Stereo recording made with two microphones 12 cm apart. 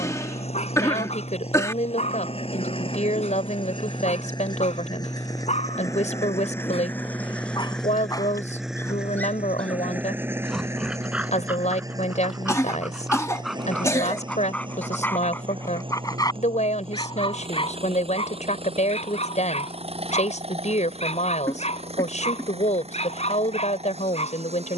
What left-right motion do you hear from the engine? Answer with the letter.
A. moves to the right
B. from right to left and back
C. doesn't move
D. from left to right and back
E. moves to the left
A.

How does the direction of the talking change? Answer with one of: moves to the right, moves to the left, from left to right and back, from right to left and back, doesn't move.
doesn't move.